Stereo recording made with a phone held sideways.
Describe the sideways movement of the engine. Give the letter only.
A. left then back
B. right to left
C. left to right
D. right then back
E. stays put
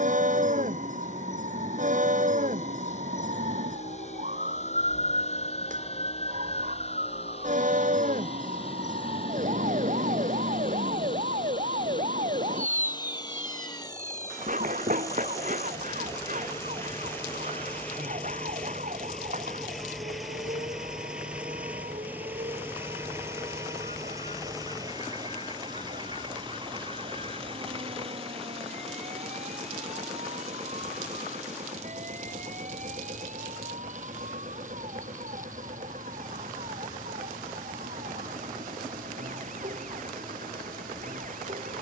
C.